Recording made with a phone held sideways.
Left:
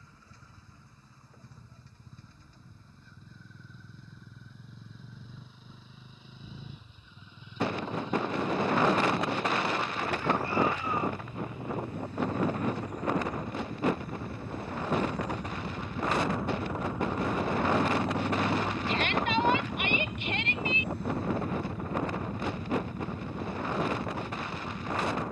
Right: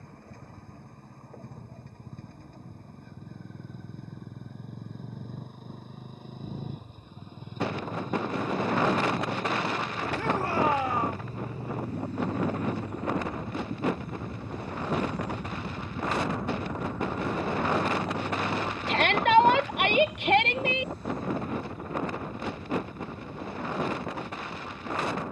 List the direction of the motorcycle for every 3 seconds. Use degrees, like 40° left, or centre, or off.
60° right, 50° right, 50° right, 40° right, 30° right, centre, 50° left, 70° left, 80° left.